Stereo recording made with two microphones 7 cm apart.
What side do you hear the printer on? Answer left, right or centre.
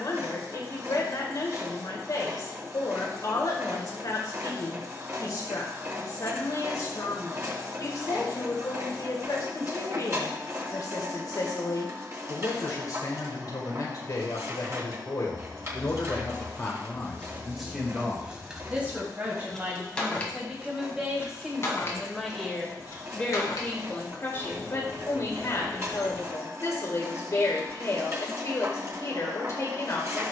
right.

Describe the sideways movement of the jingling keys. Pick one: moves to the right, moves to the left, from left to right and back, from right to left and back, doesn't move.
moves to the left.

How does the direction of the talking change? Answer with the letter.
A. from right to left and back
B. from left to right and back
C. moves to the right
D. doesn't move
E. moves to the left
B.